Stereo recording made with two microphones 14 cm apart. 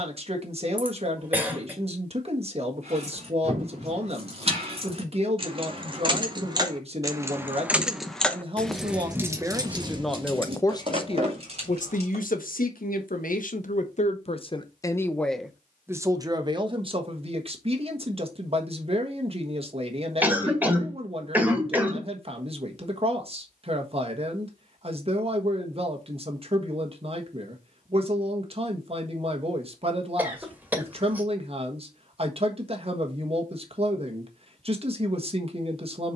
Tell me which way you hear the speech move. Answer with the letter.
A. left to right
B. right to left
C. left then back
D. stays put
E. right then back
C.